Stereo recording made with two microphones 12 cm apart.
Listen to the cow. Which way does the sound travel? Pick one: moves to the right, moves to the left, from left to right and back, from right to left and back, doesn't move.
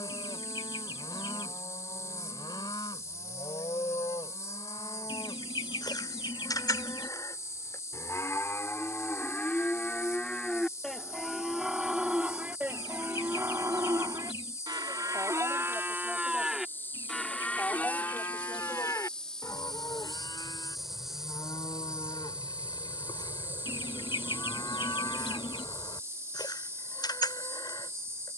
from left to right and back.